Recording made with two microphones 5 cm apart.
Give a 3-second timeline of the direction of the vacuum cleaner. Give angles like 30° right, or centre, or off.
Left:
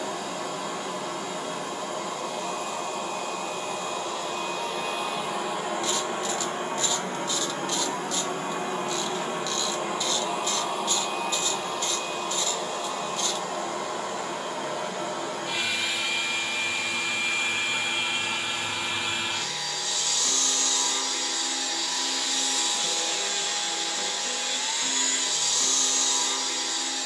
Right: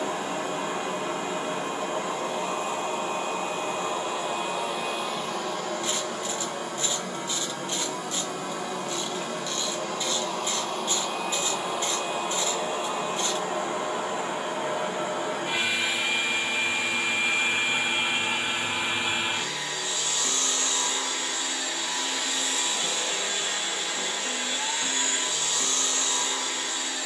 30° right, 10° right, 40° left, 10° left, 30° right, 30° right, 30° right, 30° right, 30° right.